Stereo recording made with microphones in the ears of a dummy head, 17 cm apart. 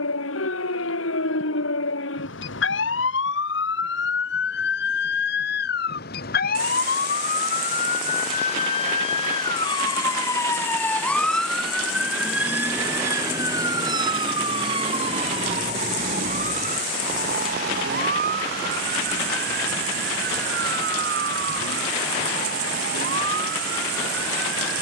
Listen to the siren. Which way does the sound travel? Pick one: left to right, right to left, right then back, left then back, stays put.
left to right.